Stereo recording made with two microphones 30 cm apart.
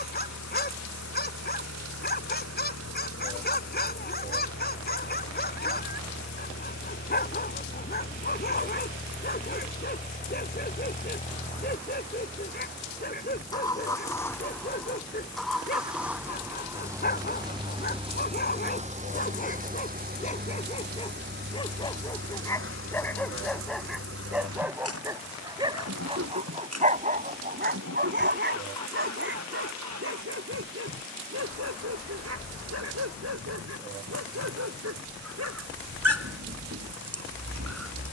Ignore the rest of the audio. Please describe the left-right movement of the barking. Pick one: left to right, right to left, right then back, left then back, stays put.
left to right.